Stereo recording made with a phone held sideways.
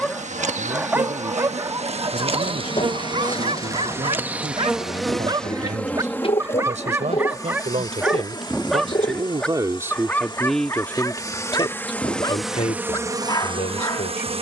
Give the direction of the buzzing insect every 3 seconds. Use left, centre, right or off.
right, centre, left, left, right.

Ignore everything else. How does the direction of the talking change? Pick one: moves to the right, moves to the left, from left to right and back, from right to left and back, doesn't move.
moves to the left.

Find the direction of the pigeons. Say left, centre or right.
left.